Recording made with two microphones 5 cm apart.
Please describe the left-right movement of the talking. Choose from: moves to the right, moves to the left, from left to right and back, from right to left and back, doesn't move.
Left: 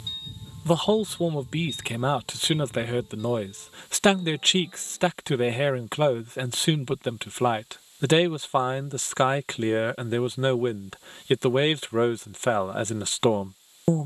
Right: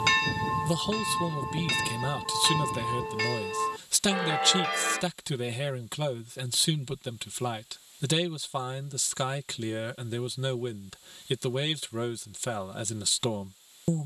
doesn't move.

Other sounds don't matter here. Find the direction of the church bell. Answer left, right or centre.
right.